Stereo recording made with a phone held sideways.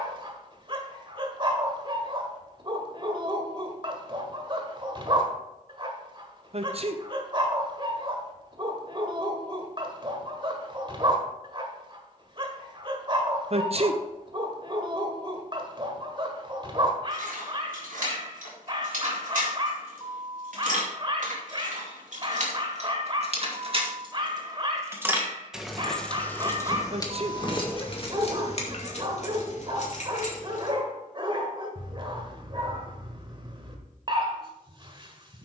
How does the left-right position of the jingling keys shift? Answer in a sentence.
In this clip you hear the jingling keys move to the left.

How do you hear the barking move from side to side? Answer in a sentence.
You can hear the barking stay put.